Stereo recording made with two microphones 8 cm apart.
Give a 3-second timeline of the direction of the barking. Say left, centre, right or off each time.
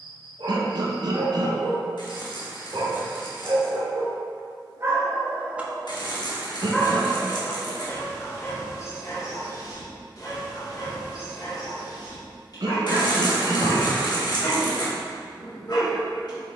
right, right, left, left, left, left.